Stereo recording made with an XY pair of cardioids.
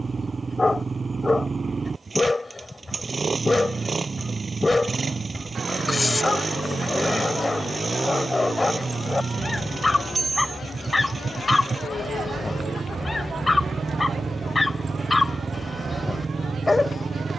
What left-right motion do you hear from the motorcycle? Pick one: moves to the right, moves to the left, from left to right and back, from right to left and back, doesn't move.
doesn't move.